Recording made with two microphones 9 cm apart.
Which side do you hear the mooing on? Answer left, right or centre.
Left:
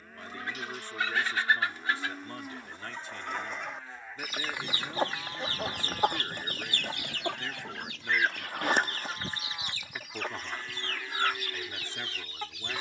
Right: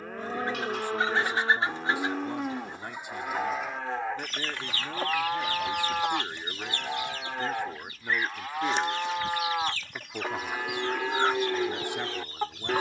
right.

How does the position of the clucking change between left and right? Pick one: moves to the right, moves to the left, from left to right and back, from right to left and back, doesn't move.
from right to left and back.